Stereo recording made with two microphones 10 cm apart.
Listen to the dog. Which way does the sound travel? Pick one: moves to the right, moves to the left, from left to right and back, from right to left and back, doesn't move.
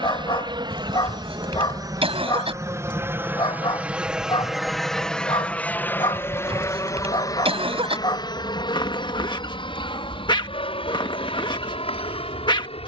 doesn't move.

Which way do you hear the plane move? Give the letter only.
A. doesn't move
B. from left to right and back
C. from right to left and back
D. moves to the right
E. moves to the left
E.